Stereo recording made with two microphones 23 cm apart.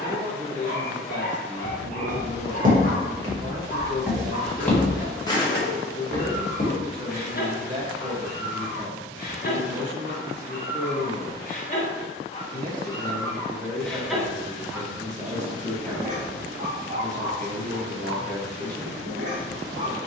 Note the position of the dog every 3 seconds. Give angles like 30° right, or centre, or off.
40° left, 40° left, 40° left, 40° left, 10° left, 40° right, 50° right.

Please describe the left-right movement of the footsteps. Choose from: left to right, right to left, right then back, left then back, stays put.
right to left.